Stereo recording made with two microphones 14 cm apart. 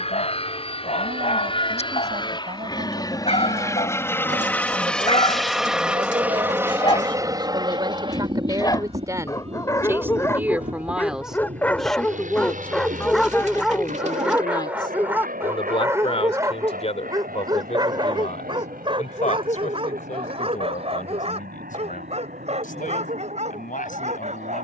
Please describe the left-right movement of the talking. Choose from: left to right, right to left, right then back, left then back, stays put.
right to left.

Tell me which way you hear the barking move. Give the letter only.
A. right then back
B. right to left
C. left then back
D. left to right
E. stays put
D.